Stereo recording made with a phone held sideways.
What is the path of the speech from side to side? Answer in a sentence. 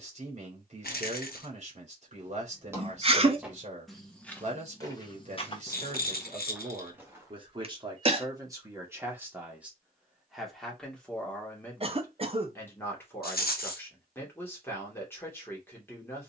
You can hear the speech move from right to left.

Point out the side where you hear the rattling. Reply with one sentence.
In this clip you hear the rattling on the left.